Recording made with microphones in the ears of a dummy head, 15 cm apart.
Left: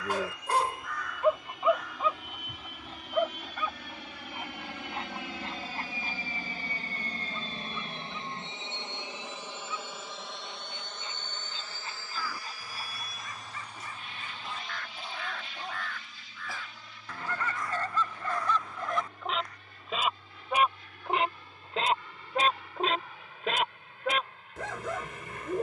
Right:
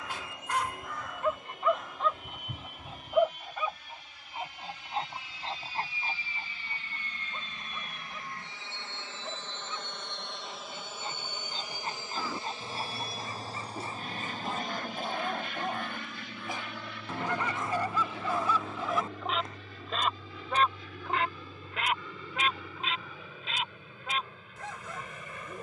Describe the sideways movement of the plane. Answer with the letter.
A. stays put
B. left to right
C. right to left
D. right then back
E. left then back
B.